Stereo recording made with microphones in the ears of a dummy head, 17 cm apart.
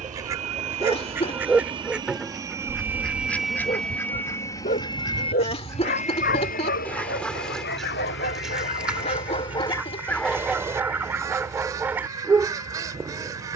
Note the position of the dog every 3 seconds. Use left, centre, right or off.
centre, left, left, centre, centre.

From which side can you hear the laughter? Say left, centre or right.
left.